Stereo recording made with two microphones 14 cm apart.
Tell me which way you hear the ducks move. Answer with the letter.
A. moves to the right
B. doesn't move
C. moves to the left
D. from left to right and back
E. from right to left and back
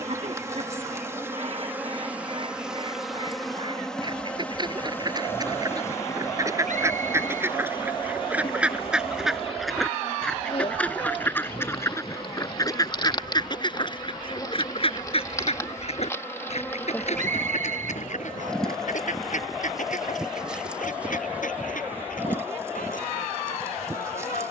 C.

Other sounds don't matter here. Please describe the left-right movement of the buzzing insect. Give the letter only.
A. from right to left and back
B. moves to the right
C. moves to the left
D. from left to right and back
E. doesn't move
A.